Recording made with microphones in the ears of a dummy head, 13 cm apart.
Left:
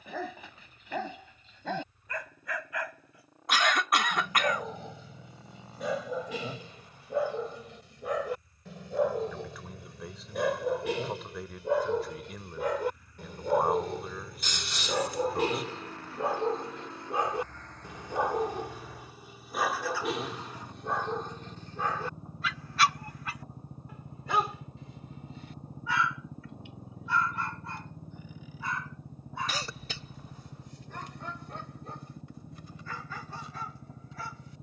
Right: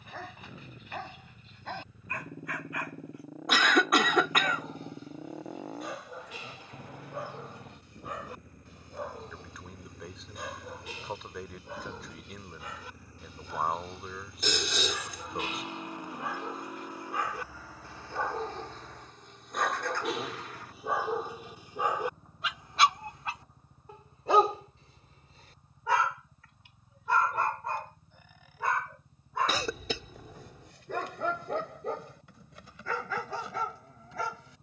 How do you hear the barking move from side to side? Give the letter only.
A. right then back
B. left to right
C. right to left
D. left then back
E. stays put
B.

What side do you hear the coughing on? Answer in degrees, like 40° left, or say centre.
70° right.